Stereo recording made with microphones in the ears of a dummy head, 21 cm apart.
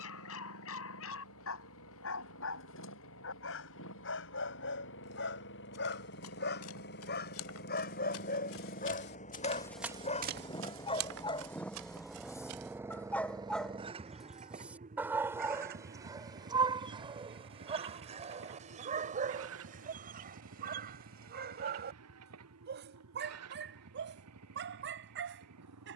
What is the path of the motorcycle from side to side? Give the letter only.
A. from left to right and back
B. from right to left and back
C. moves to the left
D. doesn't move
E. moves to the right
E.